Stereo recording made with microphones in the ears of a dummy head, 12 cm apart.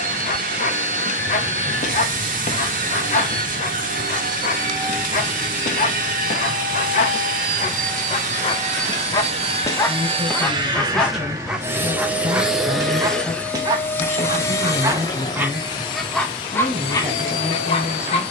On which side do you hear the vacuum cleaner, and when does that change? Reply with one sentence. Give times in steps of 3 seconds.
You can hear the vacuum cleaner on the right from 0 s, in the centre from 12 s and on the left from 15 s.